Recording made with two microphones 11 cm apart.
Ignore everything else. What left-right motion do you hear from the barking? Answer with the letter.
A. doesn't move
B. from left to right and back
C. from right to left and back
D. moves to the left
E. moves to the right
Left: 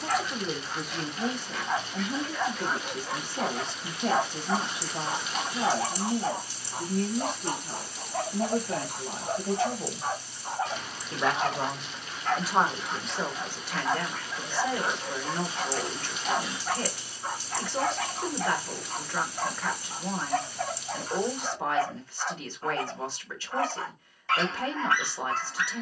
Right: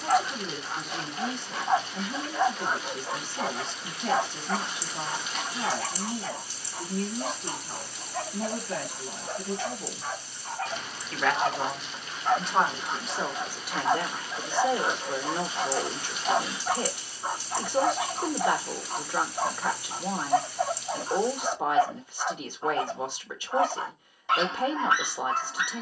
C.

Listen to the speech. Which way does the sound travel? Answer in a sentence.
In this clip you hear the speech travel towards the right.